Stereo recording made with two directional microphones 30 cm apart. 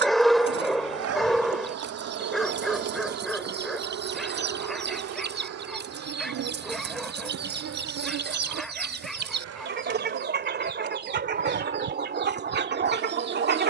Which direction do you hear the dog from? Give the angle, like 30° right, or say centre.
centre.